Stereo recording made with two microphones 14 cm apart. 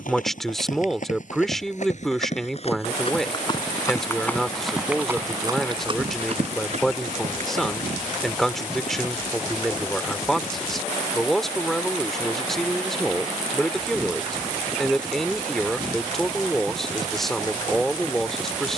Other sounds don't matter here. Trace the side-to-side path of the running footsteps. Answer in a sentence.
You can hear the running footsteps move from left to right.